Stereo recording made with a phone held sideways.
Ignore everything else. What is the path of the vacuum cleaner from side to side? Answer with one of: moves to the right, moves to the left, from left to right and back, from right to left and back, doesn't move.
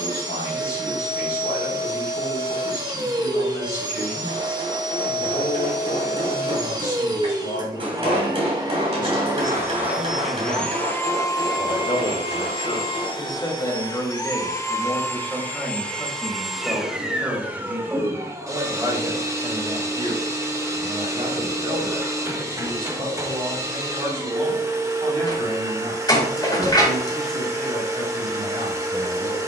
from right to left and back.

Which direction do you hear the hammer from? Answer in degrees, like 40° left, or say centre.
40° right.